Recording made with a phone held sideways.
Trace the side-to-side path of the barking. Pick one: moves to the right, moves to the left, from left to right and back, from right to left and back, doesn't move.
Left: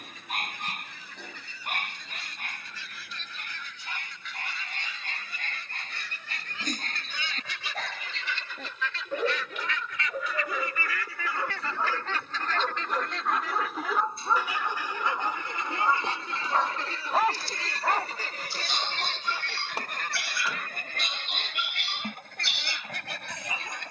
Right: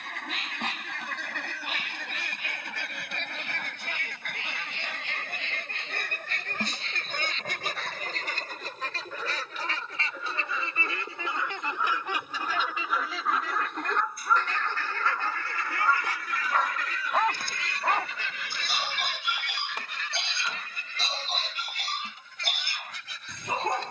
moves to the right.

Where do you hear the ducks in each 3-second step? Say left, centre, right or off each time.
right, right, right, right, centre, left, left, left.